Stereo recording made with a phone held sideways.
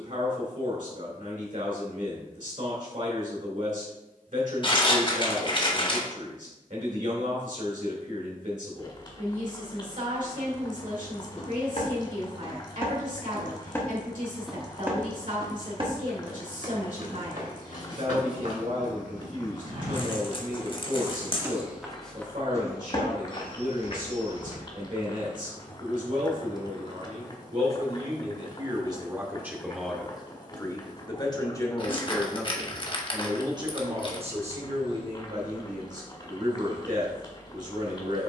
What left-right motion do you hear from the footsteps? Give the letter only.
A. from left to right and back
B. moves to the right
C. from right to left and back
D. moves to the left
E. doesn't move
A.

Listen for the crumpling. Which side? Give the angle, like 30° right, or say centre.
40° left.